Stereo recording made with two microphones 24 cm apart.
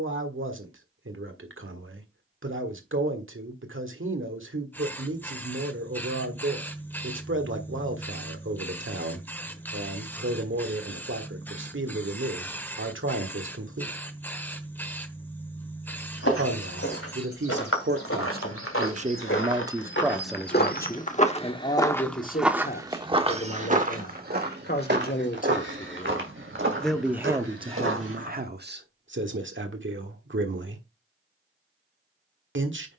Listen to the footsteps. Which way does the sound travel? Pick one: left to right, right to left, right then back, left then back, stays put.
left to right.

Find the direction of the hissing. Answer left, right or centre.
centre.